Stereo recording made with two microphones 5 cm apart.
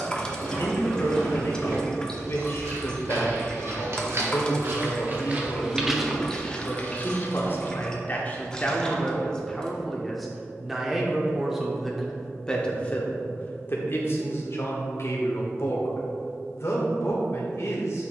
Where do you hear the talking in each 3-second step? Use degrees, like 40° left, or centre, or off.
60° left, 60° left, 40° left, centre, 40° left, 60° left.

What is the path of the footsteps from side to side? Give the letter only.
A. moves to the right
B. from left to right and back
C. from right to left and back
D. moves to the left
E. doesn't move
D.